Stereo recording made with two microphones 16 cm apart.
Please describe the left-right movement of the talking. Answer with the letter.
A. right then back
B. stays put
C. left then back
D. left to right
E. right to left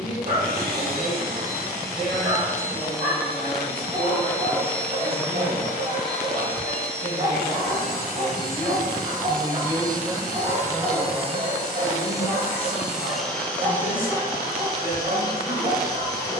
E.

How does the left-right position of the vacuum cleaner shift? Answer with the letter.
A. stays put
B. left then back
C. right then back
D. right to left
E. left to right
D.